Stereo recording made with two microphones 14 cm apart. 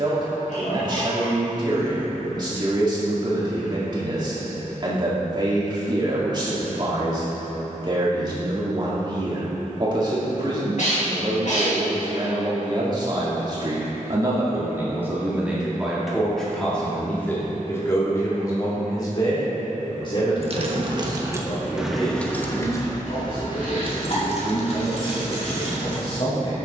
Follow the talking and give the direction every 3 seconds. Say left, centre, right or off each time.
right, right, right, right, right, centre, left, left, left.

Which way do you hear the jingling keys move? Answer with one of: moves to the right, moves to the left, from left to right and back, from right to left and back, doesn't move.
moves to the left.